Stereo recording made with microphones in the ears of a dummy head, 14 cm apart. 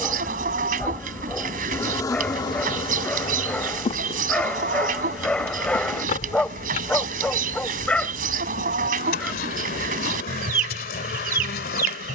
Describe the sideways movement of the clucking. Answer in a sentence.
You can hear the clucking stay put.